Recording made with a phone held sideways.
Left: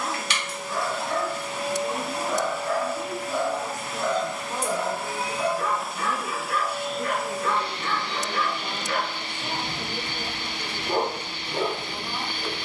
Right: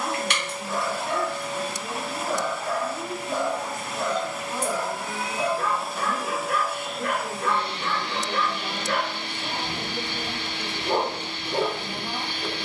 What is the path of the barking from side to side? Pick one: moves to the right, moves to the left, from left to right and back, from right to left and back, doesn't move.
doesn't move.